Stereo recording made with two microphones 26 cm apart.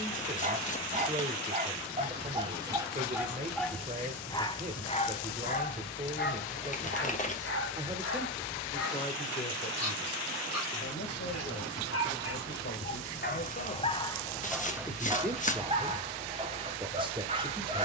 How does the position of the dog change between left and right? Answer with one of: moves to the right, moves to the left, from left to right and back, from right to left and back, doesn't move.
from right to left and back.